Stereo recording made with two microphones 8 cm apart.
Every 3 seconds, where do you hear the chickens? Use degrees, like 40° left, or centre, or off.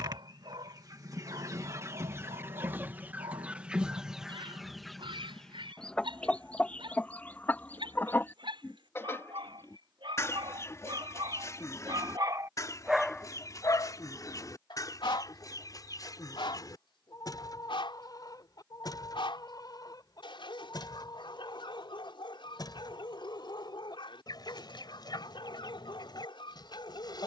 40° right, centre, 20° left, 40° left, 40° left, 50° left, 50° left, 50° left, 50° left.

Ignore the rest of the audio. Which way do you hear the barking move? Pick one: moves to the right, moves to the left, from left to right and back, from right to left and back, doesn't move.
moves to the left.